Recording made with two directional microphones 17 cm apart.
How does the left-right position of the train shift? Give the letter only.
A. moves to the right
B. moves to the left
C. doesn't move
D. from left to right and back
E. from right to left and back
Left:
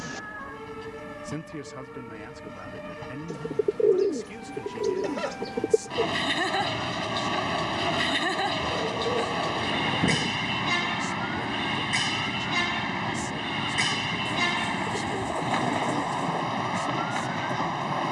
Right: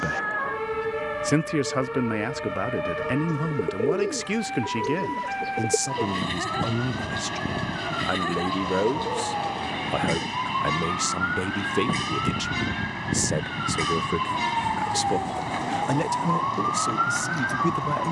C.